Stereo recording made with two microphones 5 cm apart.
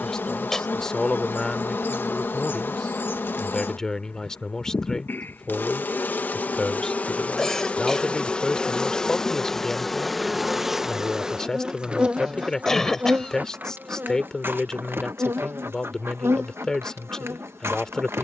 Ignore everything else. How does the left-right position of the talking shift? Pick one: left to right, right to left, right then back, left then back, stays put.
stays put.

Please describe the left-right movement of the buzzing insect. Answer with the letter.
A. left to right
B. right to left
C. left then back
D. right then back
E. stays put
A.